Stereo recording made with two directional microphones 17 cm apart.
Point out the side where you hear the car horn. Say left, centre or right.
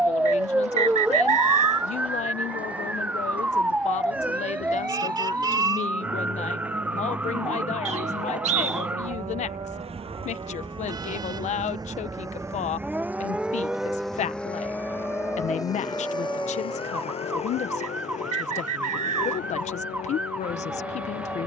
right.